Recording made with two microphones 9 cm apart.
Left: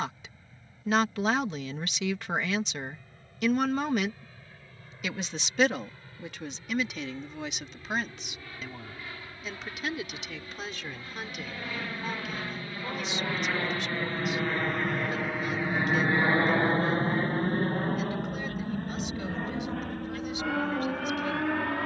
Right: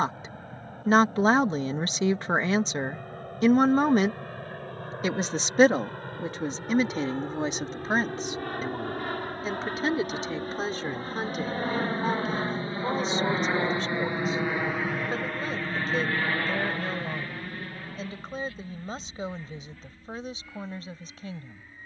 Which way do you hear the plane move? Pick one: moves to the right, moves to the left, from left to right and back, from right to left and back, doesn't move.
moves to the left.